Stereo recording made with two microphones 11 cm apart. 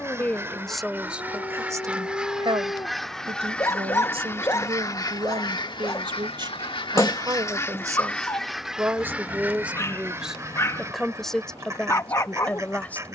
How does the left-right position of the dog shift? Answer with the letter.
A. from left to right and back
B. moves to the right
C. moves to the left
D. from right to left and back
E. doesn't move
E.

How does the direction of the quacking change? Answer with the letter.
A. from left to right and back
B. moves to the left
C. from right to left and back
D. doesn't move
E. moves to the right
C.